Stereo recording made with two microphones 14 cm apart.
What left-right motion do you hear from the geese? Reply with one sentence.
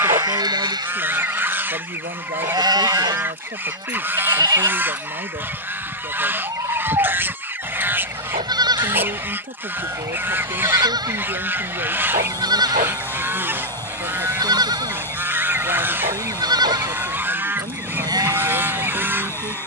You can hear the geese stay put.